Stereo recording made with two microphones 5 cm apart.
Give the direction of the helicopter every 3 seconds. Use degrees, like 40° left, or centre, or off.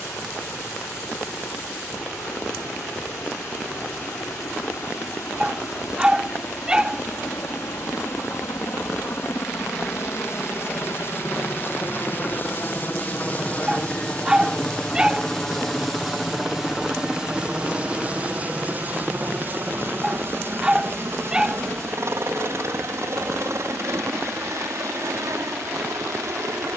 70° left, 70° left, 60° left, 50° left, 30° left, 10° right, 40° right, 50° right, 60° right.